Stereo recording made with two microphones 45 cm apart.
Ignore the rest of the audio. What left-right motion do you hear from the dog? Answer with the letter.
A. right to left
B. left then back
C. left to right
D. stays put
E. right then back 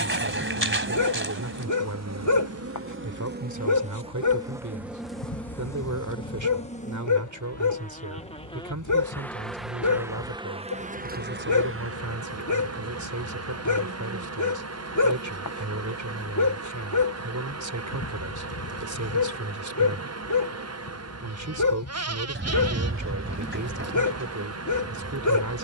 D.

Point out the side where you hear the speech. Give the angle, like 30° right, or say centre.
40° right.